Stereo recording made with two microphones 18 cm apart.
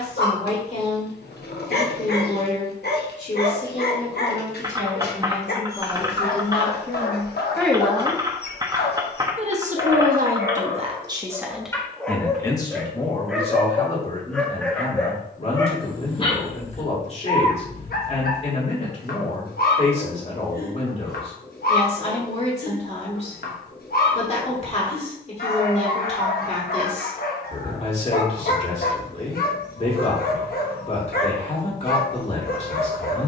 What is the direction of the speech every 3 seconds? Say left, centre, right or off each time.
left, left, centre, right, left, left, left, left, left, left, left.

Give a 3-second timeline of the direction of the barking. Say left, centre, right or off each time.
left, left, left, left, centre, left, left, left, left, left, left.